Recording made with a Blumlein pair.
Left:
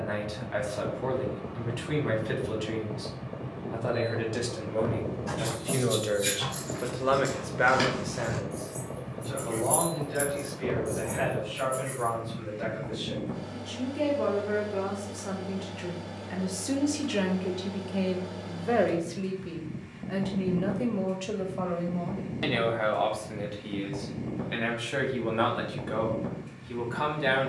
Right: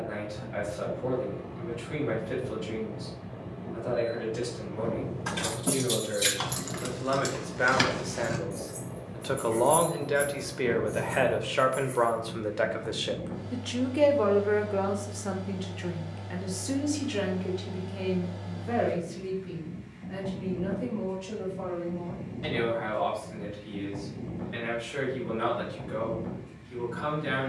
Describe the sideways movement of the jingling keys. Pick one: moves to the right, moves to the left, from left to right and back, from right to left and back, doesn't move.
moves to the left.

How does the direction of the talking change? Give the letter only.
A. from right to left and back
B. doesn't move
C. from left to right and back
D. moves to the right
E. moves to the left
C.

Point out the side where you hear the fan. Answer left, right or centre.
left.